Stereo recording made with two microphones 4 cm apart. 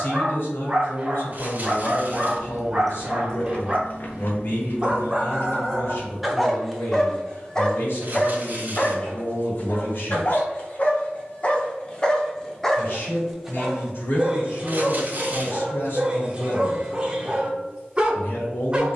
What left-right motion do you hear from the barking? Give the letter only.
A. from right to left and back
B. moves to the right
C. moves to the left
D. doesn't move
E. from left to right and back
A.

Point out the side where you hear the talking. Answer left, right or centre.
left.